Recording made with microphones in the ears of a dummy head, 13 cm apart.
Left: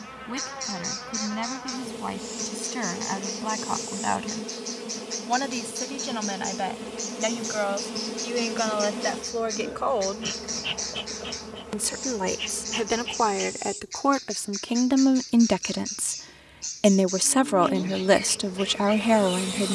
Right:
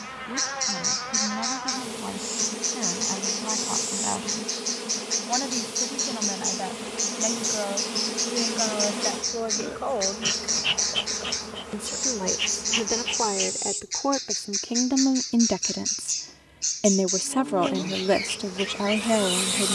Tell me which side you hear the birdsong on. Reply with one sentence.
You can hear the birdsong on the right.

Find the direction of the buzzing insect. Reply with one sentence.
You can hear the buzzing insect on the right.